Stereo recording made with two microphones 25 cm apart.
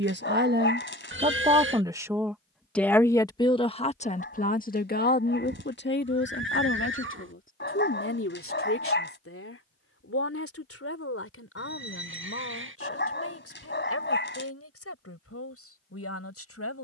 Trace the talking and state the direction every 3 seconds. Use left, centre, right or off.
right, left, left, left, left, left.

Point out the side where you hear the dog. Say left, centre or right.
left.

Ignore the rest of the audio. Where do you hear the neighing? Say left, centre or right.
right.